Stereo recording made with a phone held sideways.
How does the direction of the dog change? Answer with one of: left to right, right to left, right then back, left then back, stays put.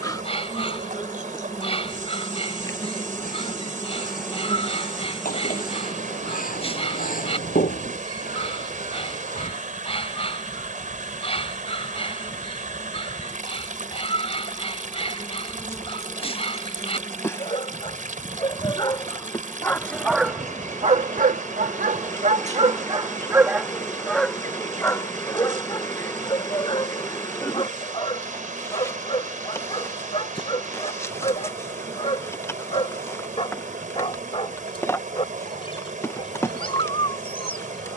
right then back.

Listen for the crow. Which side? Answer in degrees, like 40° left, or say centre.
60° left.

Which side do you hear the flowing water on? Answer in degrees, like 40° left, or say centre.
60° right.